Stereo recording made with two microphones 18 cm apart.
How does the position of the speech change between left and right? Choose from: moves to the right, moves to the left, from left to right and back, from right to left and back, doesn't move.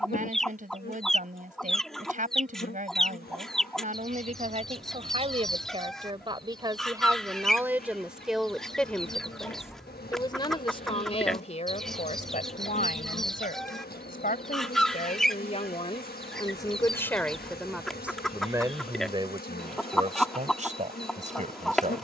from right to left and back.